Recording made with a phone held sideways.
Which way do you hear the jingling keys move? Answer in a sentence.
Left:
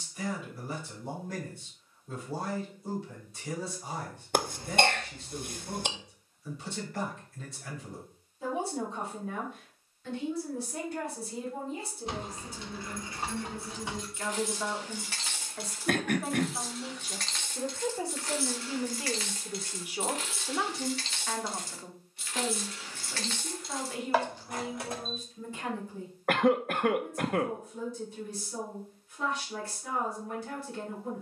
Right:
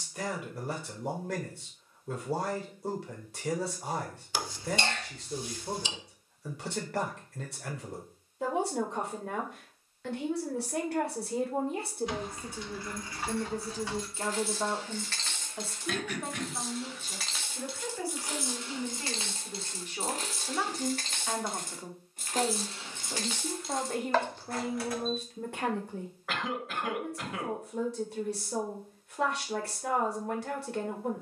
In this clip you hear the jingling keys move from left to right and back again.